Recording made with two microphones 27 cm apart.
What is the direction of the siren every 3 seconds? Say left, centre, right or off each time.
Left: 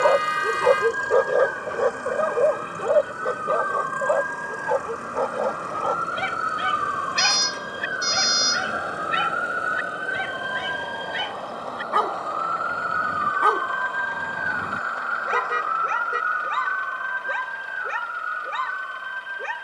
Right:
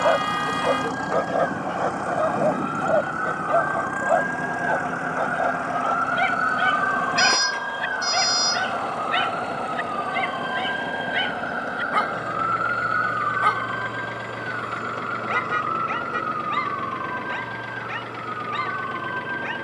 left, left, left, centre, right, right, right.